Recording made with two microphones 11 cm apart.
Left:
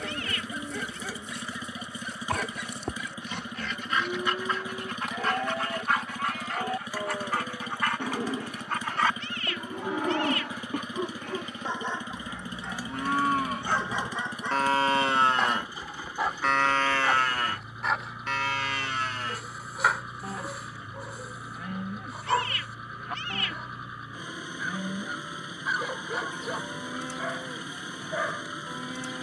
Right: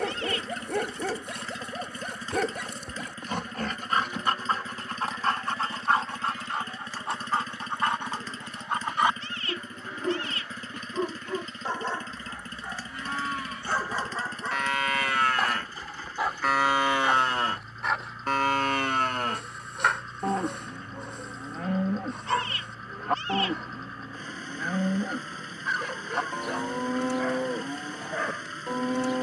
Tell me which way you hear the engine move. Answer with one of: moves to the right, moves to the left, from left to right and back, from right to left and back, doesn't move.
doesn't move.